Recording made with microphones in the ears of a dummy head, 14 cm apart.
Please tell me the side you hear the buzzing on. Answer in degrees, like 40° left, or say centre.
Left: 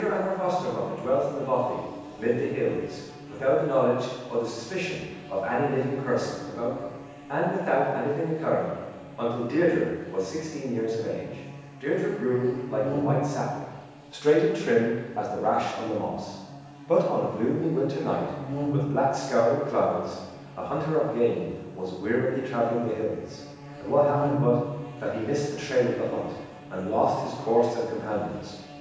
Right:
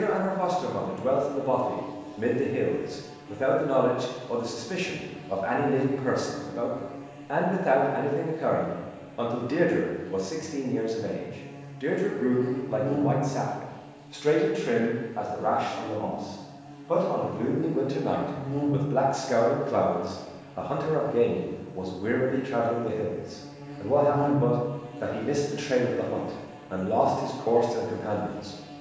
30° right.